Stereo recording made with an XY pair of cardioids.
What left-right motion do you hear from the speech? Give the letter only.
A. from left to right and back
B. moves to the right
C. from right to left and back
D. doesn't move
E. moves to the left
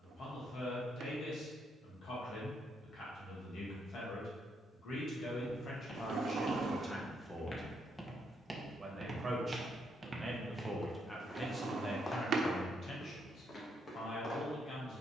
A.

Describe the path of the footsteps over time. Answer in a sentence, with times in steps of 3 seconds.
In this clip you hear the footsteps not at all from 0 s, on the left from 3 s, in the centre from 9 s and on the left from 12 s.